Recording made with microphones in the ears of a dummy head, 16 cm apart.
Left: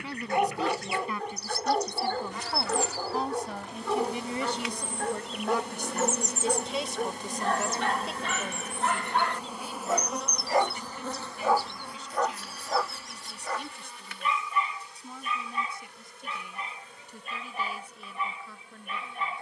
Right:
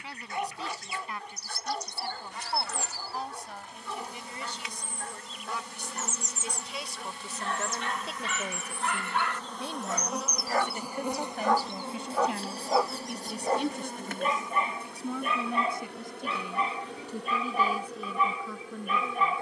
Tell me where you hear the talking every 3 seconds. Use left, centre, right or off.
left, left, centre, right, right, right, right.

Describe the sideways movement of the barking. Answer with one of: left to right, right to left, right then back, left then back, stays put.
left to right.